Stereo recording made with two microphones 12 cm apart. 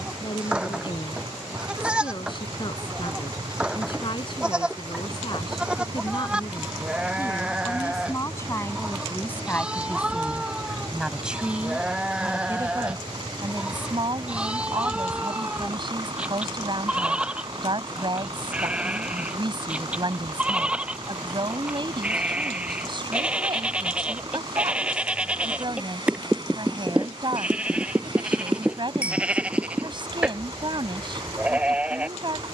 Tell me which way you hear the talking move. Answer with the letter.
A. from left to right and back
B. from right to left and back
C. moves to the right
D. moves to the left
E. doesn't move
C.